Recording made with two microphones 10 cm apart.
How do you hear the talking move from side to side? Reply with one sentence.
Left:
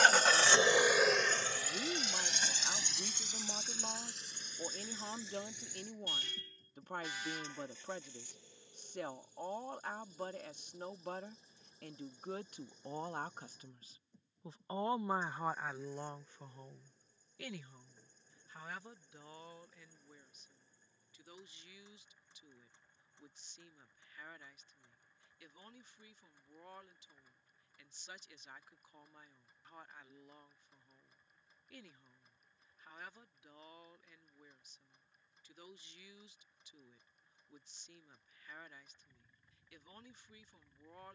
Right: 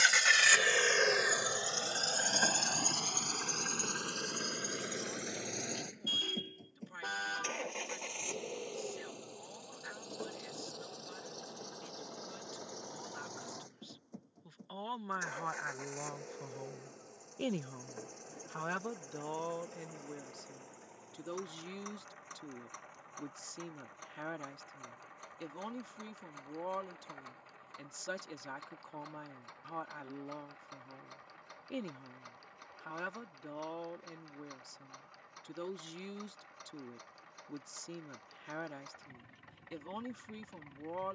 In this clip you hear the talking move to the right.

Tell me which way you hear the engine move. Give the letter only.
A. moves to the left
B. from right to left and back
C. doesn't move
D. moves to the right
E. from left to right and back
D.